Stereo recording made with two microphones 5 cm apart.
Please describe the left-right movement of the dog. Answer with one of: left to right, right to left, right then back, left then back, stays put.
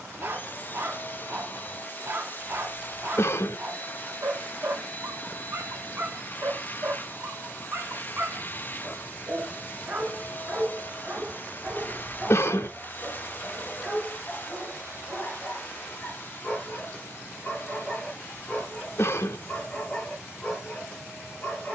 right to left.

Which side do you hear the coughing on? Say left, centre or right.
left.